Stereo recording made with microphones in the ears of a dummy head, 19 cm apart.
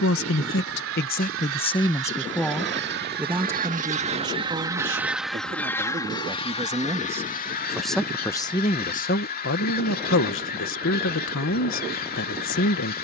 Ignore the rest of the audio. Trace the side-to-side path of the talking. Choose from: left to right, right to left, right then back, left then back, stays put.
right then back.